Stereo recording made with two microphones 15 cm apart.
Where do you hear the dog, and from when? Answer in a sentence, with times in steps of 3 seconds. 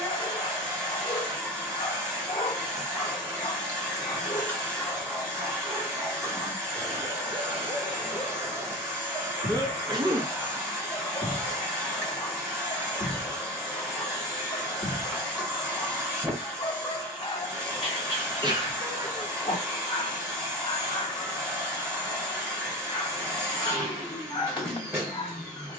In this clip you hear the dog on the left from 0 s, in the centre from 3 s, on the right from 6 s, in the centre from 9 s and on the left from 12 s.